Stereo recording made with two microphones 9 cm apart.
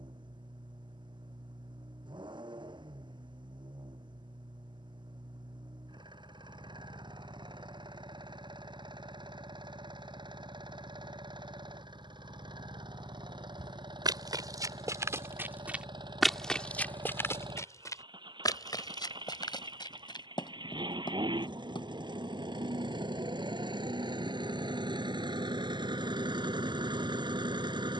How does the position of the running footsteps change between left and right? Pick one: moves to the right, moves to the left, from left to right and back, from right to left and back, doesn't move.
moves to the left.